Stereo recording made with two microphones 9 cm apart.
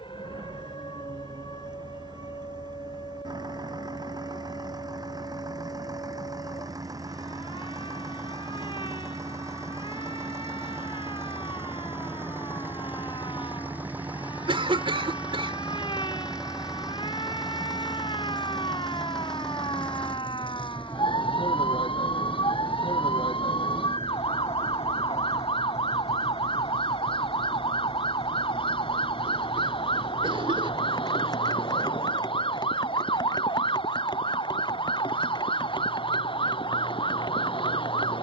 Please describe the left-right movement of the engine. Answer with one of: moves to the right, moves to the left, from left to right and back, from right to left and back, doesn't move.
moves to the left.